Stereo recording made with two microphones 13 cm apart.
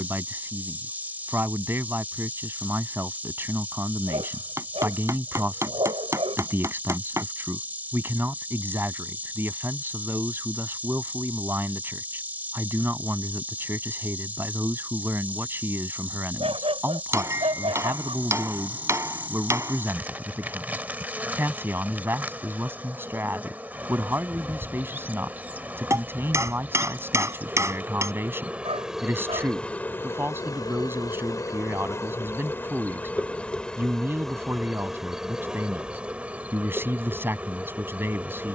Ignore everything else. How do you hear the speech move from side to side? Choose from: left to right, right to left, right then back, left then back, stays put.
stays put.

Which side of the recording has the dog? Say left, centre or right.
right.